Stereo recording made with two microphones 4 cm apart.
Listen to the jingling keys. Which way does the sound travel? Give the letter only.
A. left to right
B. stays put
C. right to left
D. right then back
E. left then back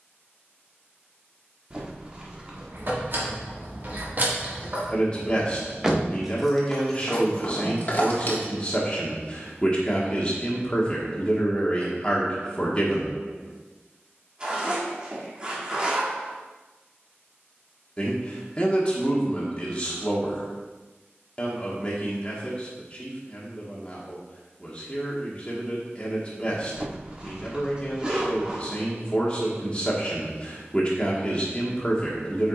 C.